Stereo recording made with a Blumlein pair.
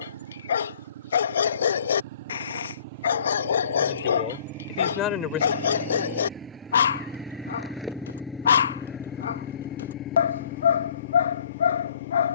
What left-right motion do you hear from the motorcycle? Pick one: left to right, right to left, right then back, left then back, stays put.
right to left.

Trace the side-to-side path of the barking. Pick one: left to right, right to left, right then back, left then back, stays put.
stays put.